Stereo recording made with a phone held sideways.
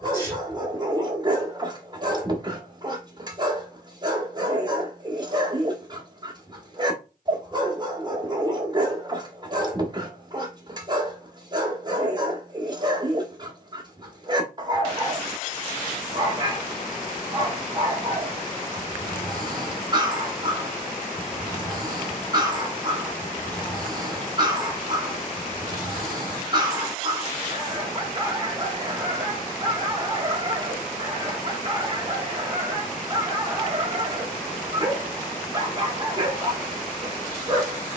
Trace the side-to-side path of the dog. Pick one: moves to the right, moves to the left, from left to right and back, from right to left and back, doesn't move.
doesn't move.